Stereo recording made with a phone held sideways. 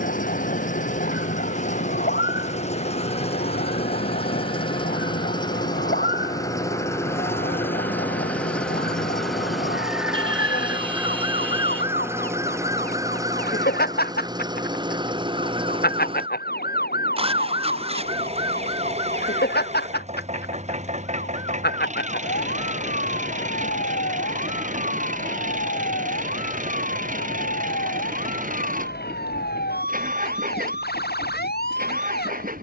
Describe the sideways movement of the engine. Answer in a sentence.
You can hear the engine go from the left side to the right.